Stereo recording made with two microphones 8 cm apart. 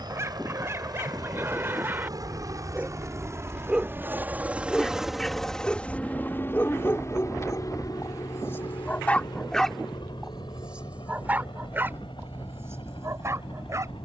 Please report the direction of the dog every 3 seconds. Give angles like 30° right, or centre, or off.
30° right, centre, 30° left, 10° right, 40° right.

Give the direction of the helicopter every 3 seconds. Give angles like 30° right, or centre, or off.
50° right, 20° right, 40° left, 70° left, 70° left.